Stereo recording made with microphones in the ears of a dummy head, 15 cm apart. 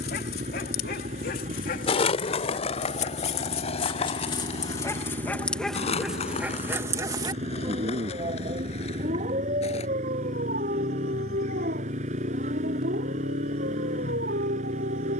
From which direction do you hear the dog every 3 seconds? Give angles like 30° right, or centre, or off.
50° left, 20° left, 20° right, 50° right, 70° right.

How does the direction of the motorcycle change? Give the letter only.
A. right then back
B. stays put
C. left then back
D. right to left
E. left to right
B.